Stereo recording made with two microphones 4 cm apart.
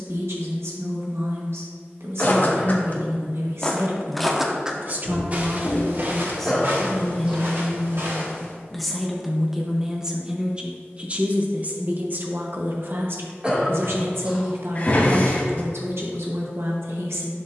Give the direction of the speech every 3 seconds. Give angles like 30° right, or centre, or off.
80° right, 50° right, 10° left, 20° right, 60° right, 80° right.